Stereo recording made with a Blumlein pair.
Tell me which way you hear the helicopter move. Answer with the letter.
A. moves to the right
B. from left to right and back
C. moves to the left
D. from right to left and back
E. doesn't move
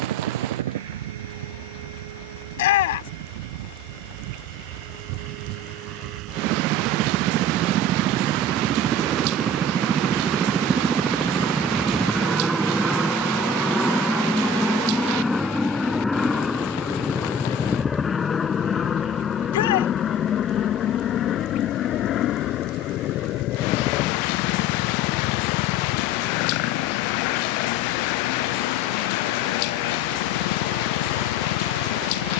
C.